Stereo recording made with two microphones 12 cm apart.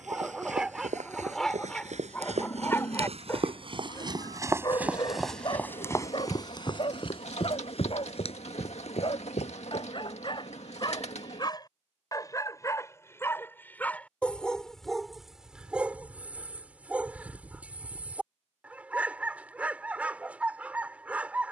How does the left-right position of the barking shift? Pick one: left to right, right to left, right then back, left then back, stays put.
left then back.